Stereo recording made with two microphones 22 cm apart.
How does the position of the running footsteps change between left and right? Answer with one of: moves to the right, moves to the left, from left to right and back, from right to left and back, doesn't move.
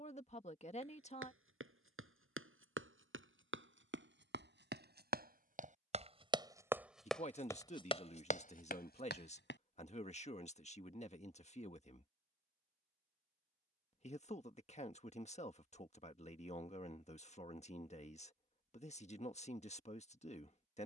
moves to the left.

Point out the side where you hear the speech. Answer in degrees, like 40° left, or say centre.
30° left.